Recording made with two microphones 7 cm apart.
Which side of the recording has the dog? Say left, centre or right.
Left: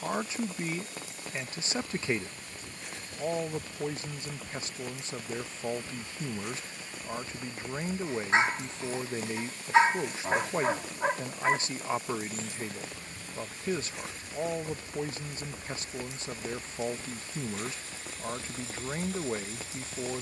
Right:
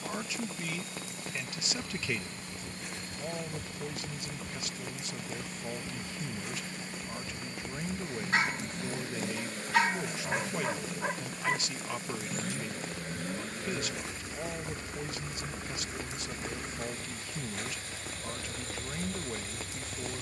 left.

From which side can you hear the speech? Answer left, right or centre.
left.